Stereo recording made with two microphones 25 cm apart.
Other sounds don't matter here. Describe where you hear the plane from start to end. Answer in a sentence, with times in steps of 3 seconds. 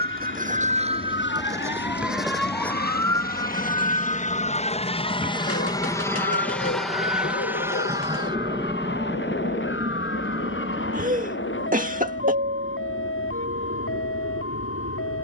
In this clip you hear the plane on the left from 0 s, in the centre from 6 s and on the right from 9 s.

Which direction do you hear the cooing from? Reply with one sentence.
You can hear the cooing on the left.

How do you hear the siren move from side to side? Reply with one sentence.
You can hear the siren move from right to left.